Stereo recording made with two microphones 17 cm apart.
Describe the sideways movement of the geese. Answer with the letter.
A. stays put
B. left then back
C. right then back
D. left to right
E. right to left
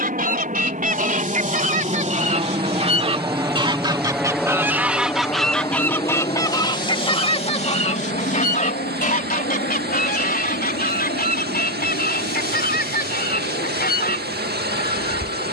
E.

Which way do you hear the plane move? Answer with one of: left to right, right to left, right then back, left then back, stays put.
right to left.